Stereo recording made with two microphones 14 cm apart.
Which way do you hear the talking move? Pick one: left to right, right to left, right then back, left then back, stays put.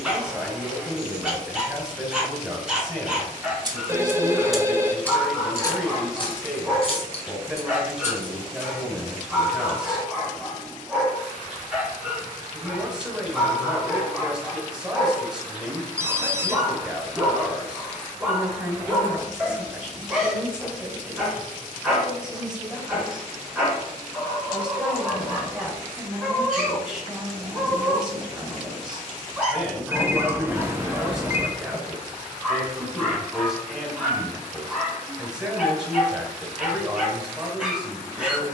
stays put.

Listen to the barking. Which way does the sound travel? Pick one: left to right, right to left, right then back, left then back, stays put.
stays put.